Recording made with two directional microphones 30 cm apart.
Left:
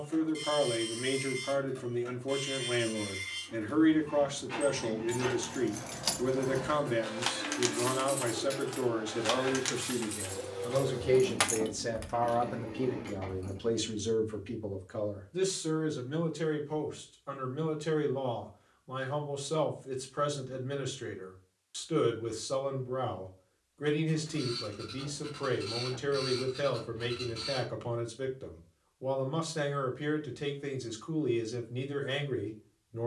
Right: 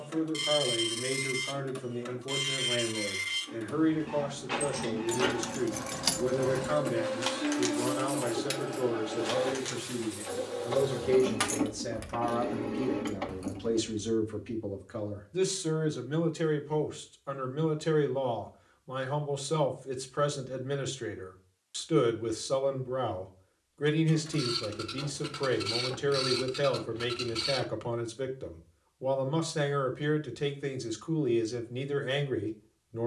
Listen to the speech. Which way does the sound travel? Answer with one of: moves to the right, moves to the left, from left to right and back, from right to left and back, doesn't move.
moves to the right.